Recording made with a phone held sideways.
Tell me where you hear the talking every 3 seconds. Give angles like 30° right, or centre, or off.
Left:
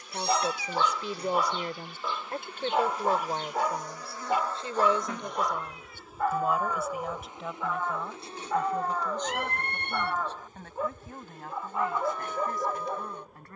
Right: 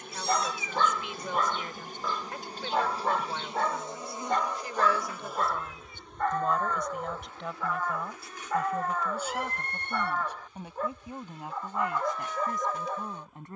40° left, 30° left, centre, 10° right, 20° right.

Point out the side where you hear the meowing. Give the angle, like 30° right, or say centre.
60° left.